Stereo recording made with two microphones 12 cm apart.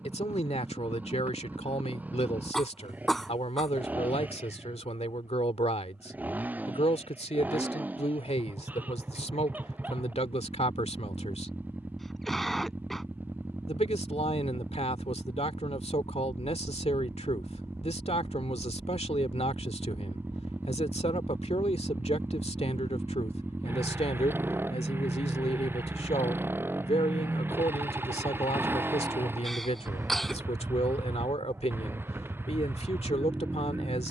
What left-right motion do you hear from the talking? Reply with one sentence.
You can hear the talking stay put.